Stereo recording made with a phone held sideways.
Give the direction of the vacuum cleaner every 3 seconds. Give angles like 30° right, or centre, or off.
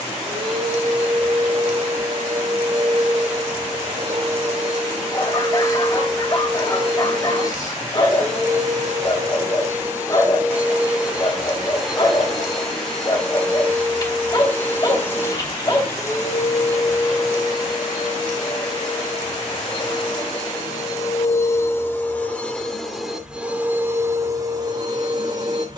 50° right, 50° right, 40° right, 10° right, 10° left, 30° left, 40° left, 10° left, 30° right.